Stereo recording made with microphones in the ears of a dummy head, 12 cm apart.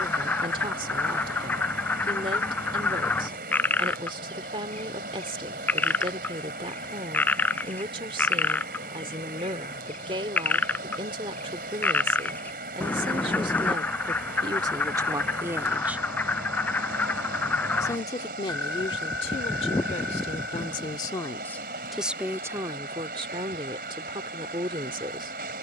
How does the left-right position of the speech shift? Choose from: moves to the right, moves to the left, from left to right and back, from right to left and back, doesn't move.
from right to left and back.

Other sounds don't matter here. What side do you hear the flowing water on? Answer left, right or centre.
right.